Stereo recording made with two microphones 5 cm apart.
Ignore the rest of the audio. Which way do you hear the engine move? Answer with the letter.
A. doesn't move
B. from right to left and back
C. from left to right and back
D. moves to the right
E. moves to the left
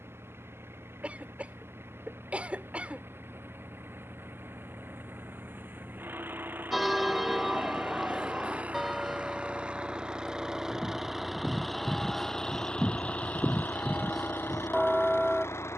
E.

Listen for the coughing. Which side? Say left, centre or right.
right.